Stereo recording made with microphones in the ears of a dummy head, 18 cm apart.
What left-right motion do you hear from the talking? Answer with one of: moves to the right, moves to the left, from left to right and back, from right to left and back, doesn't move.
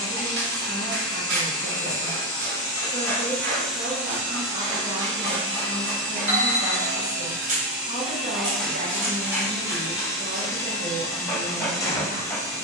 doesn't move.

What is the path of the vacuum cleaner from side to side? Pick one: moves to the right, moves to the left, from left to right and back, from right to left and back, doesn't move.
from left to right and back.